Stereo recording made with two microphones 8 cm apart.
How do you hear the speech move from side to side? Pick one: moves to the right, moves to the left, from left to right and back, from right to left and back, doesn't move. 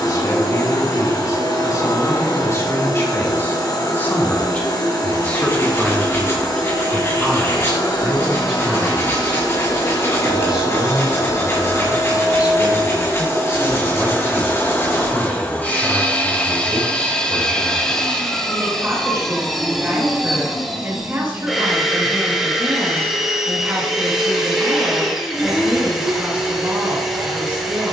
moves to the right.